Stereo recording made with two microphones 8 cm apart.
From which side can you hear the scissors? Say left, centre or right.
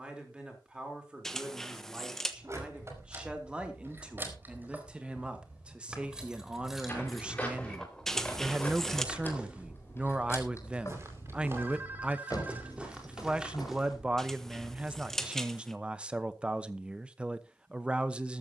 centre.